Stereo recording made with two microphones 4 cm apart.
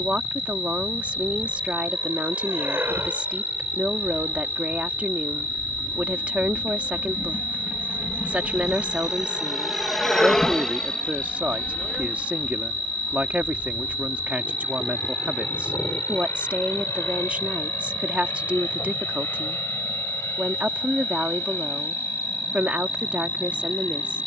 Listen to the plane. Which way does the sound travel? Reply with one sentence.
In this clip you hear the plane move to the left.